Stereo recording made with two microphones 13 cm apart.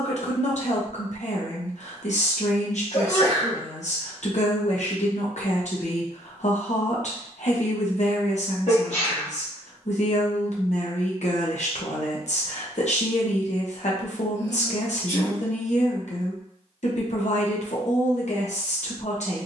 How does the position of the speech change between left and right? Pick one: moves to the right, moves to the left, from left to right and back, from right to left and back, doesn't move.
doesn't move.